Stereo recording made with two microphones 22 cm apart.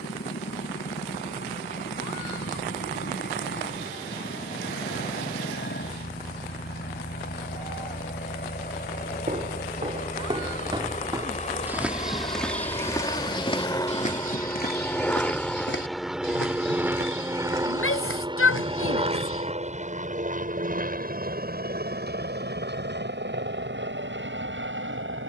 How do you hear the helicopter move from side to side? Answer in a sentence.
In this clip you hear the helicopter move from left to right.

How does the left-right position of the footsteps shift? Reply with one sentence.
You can hear the footsteps go from the right side to the left.